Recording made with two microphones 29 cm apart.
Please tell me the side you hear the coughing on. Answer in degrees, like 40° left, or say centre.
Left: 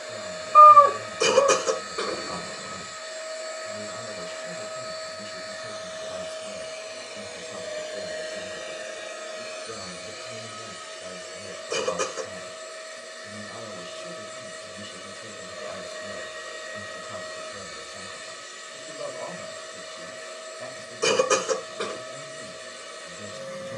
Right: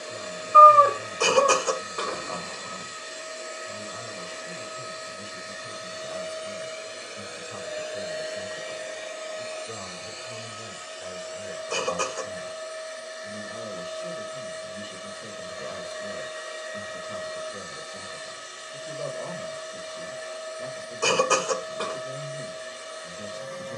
20° left.